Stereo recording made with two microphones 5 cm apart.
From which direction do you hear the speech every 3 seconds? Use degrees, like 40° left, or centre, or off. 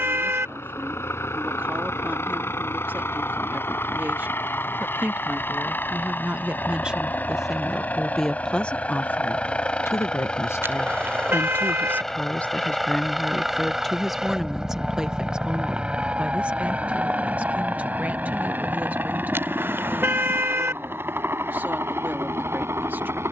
40° right, 40° right, 10° right, 50° left, 10° left, 20° right, 40° right, 40° right.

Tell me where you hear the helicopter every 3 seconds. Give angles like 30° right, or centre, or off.
60° left, 50° left, 30° left, 20° left, centre, 20° right, 40° right, 50° right.